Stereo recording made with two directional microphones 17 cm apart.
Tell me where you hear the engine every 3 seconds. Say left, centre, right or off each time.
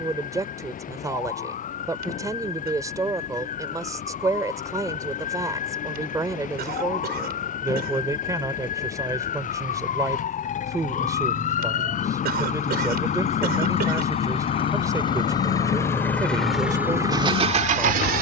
left, left, left, left, left, centre.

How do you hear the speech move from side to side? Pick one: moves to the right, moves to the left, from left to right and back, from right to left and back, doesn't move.
doesn't move.